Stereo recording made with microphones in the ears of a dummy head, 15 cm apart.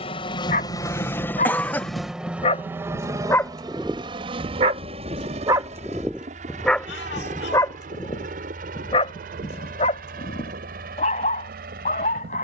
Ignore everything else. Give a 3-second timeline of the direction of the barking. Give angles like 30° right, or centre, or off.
40° left, 20° right, 20° left, 40° left.